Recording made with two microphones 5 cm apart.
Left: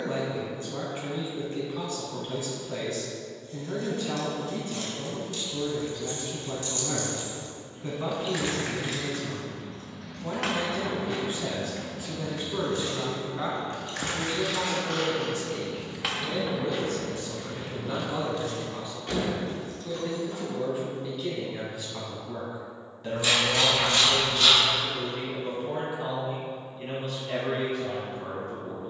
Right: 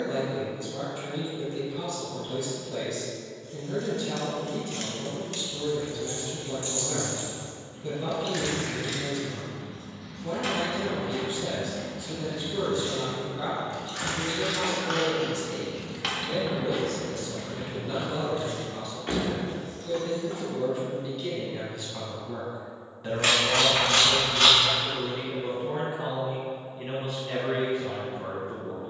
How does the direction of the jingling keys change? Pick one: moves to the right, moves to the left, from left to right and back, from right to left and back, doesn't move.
from right to left and back.